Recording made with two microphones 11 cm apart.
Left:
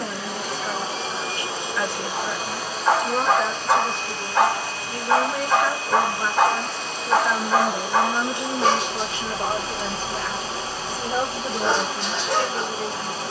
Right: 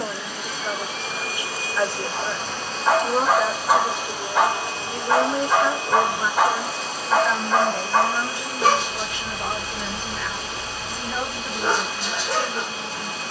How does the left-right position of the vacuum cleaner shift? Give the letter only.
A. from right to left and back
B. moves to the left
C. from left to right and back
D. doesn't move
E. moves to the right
C.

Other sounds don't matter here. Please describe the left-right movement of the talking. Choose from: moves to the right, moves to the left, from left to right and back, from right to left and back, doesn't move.
moves to the left.